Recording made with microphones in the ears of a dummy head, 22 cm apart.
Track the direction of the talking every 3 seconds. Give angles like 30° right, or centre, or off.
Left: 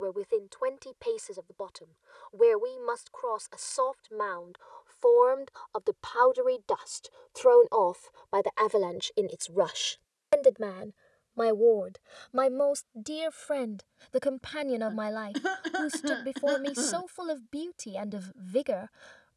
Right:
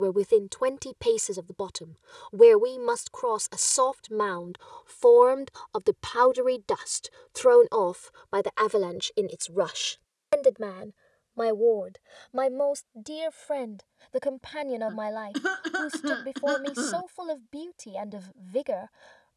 70° right, 60° right, 30° right, centre, 10° left, 10° left, 10° left.